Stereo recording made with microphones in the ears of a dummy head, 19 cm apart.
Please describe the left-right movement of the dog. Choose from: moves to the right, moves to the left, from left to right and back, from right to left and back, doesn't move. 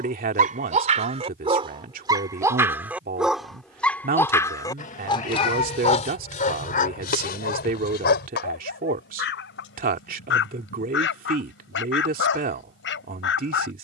moves to the left.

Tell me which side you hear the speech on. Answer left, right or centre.
right.